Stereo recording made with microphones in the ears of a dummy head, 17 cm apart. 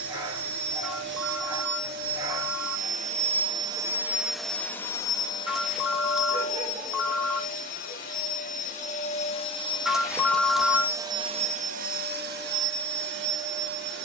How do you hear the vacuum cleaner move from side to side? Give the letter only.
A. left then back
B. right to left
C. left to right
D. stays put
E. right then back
A.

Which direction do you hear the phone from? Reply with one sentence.
In this clip you hear the phone in the centre.